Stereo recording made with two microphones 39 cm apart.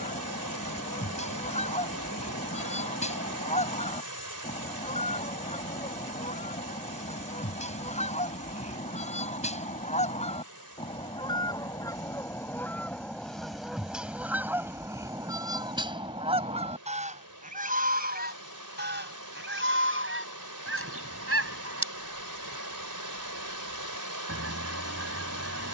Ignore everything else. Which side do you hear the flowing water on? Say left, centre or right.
right.